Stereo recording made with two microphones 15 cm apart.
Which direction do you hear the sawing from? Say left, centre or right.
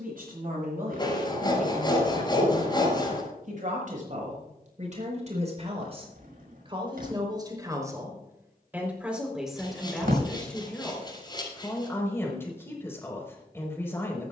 left.